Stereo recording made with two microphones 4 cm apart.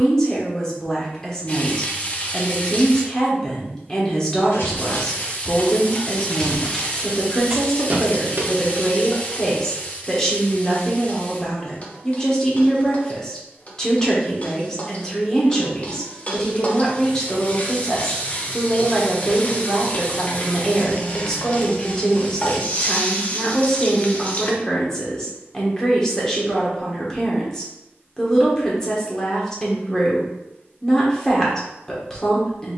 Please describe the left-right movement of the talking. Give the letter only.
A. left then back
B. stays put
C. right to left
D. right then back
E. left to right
B.